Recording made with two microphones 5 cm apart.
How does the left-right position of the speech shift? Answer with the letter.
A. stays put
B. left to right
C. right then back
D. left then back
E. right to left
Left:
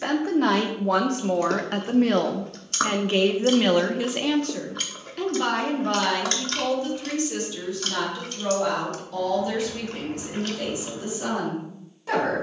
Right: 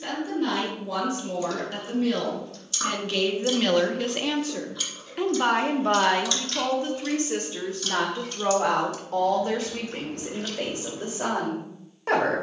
B.